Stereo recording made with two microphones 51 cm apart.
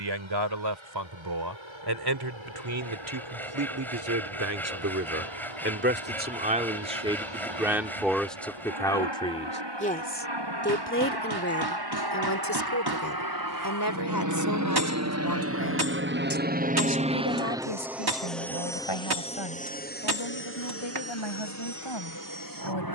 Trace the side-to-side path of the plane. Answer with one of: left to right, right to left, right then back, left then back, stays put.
right to left.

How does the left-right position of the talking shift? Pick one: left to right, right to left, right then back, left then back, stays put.
right to left.